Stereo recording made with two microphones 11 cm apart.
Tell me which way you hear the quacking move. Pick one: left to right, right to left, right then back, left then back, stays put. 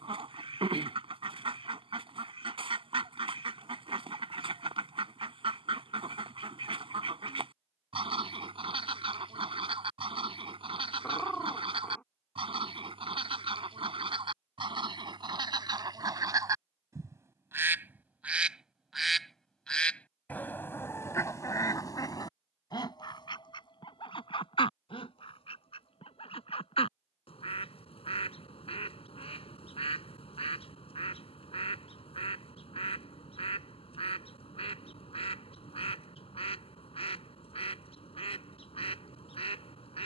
right to left.